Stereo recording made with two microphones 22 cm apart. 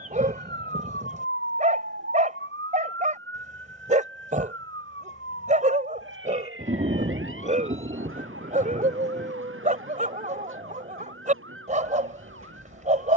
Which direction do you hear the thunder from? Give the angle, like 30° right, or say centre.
40° right.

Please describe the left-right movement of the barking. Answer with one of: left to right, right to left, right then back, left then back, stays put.
stays put.